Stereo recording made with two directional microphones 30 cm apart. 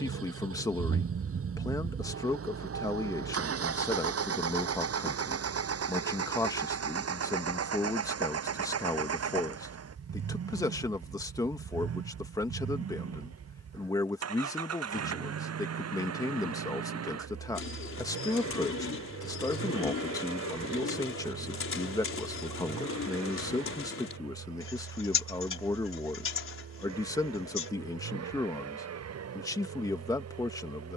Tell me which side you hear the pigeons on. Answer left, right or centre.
left.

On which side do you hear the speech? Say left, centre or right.
centre.